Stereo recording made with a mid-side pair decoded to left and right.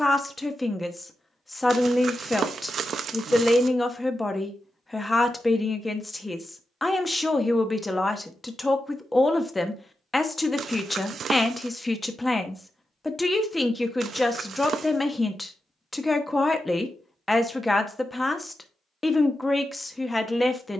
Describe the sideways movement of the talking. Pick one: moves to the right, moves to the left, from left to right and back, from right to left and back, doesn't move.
doesn't move.